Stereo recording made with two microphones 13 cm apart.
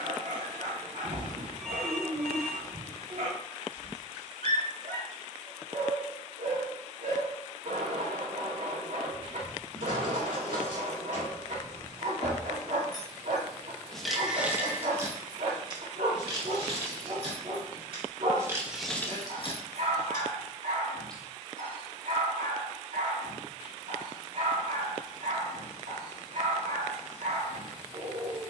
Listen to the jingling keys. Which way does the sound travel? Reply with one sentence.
You can hear the jingling keys move from left to right and back again.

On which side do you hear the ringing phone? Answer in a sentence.
You can hear the ringing phone in the centre.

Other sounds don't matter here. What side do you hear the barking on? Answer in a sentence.
In this clip you hear the barking on the right.